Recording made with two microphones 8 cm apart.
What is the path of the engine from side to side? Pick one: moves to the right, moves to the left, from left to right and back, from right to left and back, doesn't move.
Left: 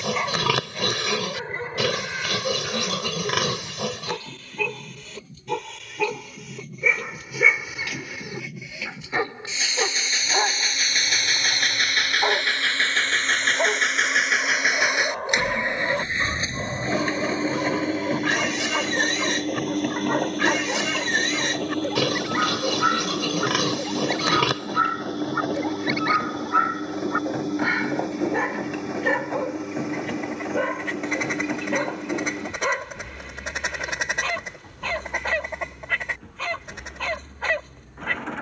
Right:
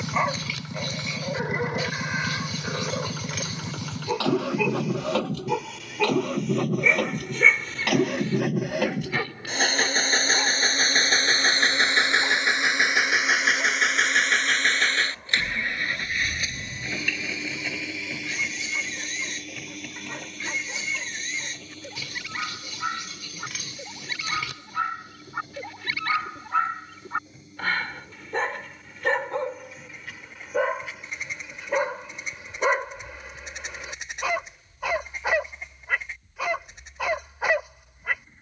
moves to the left.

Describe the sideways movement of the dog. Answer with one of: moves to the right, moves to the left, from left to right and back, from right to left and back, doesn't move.
from right to left and back.